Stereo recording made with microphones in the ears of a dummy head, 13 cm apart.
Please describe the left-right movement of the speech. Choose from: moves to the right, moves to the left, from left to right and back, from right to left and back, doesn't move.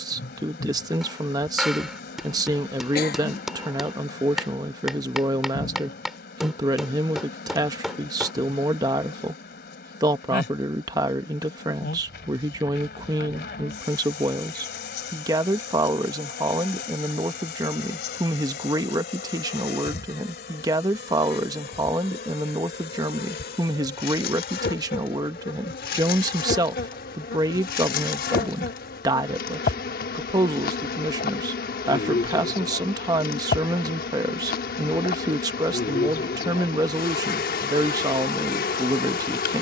doesn't move.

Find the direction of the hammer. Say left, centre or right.
centre.